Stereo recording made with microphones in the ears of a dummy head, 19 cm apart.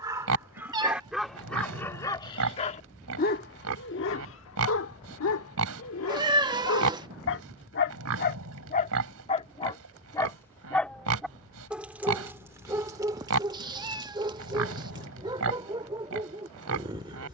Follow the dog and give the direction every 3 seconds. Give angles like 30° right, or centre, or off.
centre, 60° left, 60° left, 10° left, 20° right, 20° right.